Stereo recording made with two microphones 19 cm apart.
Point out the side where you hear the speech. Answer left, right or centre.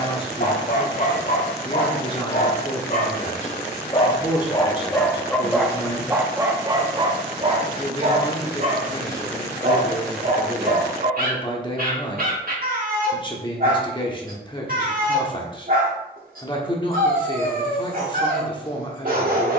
left.